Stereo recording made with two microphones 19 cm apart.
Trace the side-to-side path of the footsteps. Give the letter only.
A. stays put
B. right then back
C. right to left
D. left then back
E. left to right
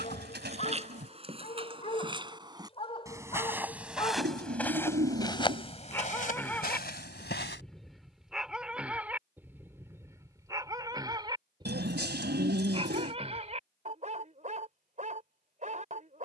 C.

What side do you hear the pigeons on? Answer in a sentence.
In this clip you hear the pigeons on the right.